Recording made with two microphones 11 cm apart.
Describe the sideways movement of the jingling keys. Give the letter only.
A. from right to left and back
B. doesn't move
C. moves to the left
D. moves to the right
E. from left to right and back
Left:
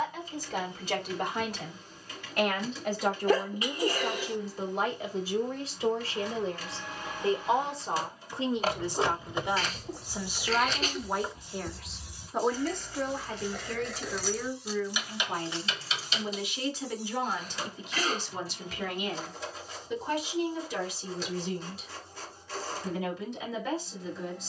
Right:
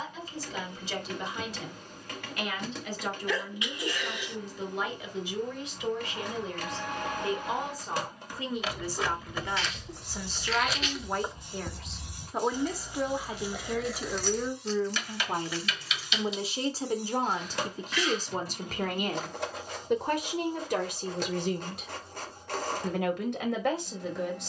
E.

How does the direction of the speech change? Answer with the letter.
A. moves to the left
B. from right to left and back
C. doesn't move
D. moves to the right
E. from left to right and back
D.